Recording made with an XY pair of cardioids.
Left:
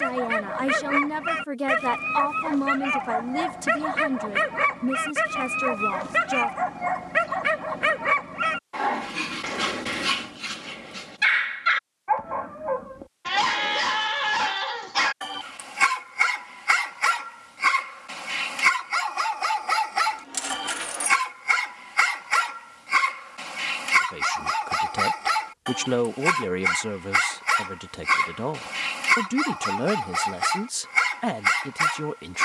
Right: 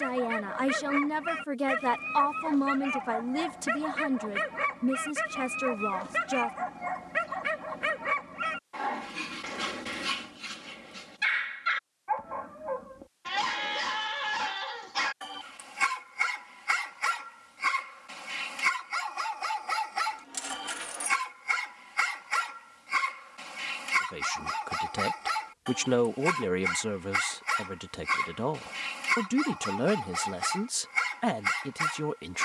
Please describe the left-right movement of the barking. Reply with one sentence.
You can hear the barking stay put.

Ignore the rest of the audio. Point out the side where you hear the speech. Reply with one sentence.
In this clip you hear the speech in the centre.